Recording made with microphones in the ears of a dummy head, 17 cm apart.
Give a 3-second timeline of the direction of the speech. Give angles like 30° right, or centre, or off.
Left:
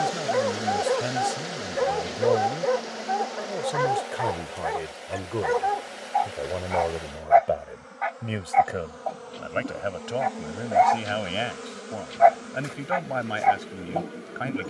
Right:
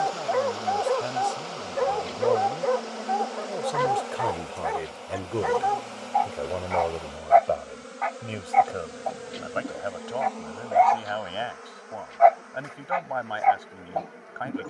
20° left, centre, 10° left, 30° left, 30° left.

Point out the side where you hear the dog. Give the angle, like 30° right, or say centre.
centre.